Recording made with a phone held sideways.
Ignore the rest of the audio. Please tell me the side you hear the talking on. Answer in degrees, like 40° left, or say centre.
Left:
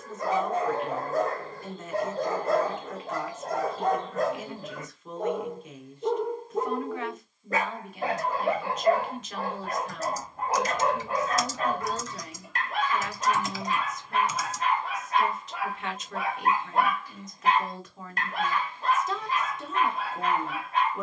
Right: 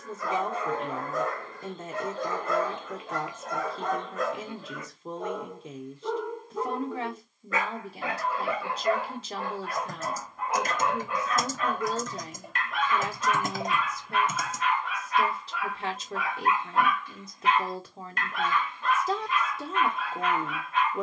30° right.